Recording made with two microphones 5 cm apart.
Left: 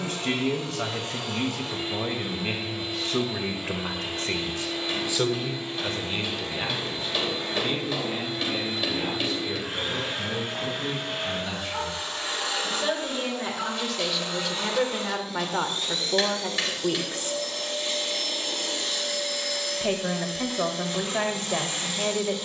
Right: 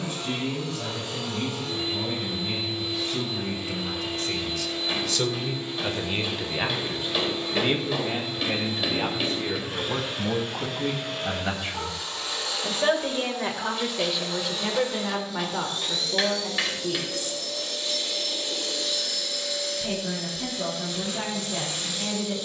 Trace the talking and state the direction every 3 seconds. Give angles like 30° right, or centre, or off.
70° left, 40° left, 30° right, 40° right, 10° right, 30° left, 60° left, 60° left.